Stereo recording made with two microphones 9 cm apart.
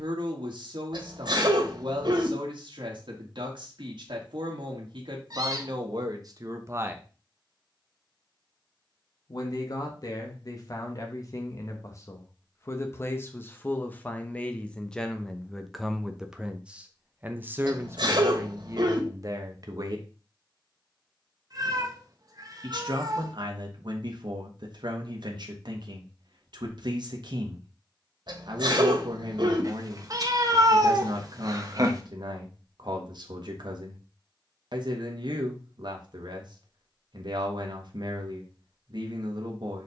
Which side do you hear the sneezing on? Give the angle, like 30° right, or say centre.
60° right.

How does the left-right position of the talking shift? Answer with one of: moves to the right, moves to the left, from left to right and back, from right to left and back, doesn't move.
from right to left and back.